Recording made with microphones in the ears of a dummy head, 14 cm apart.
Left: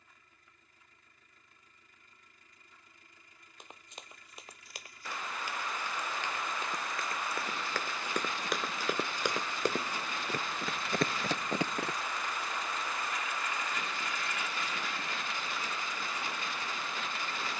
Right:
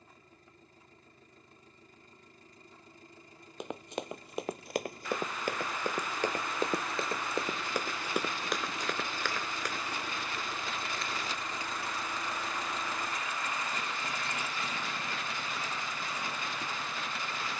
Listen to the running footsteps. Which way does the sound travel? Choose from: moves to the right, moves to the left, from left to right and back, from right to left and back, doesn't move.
moves to the left.